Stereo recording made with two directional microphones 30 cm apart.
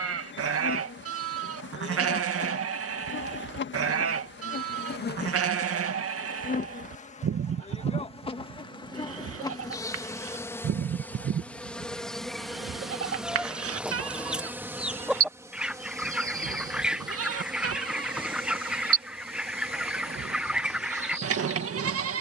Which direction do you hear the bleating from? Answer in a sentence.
You can hear the bleating on the right.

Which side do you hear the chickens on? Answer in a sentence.
In this clip you hear the chickens in the centre.